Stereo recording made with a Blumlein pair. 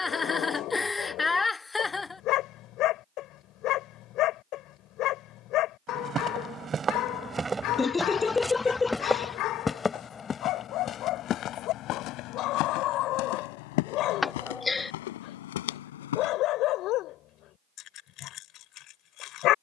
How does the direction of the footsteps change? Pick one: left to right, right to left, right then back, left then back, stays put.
right to left.